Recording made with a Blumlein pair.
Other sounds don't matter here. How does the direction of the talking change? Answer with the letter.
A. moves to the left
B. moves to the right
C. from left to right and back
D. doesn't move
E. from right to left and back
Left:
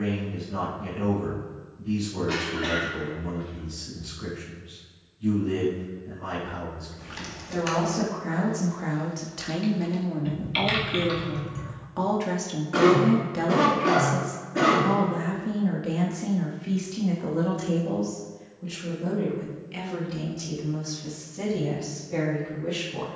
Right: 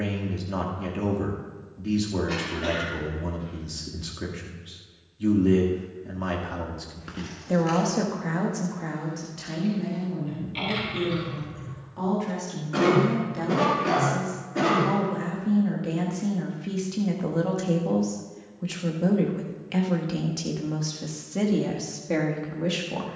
E.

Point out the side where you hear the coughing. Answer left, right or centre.
centre.